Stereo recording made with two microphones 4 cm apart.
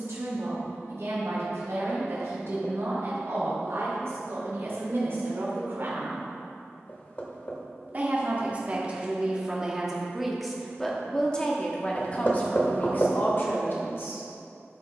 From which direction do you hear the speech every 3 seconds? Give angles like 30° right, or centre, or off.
70° right, 60° right, 30° right, centre, 40° left.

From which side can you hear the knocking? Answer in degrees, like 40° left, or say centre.
40° left.